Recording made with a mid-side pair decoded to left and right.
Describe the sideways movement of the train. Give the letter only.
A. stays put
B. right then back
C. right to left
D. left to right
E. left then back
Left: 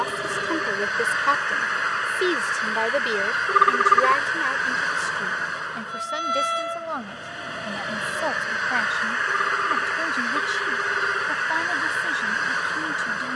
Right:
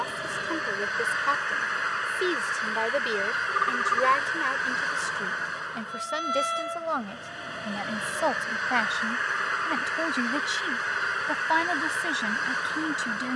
A.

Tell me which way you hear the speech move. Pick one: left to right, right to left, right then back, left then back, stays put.
left to right.